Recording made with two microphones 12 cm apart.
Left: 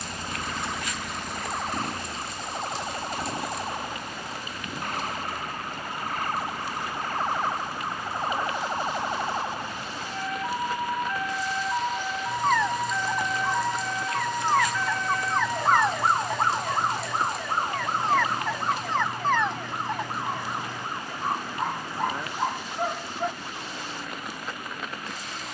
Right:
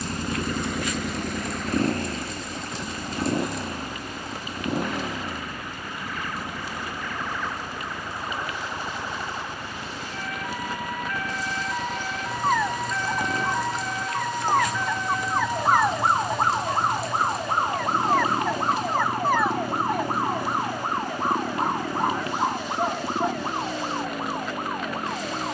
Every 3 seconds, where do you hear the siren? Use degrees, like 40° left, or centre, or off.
60° left, 50° left, 40° left, 30° left, 10° left, 20° right, 40° right, 50° right, 60° right.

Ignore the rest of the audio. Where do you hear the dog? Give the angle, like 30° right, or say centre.
10° right.